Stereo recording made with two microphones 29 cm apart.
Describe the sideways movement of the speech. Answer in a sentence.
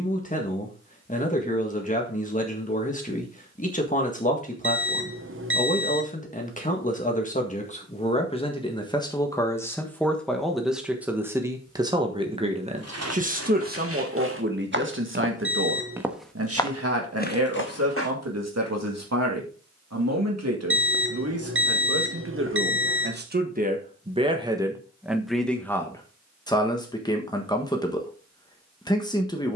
You can hear the speech move from left to right and back again.